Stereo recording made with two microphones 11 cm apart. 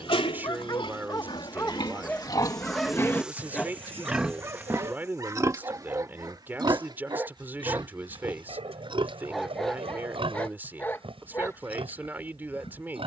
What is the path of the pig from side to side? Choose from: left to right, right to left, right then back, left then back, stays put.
left to right.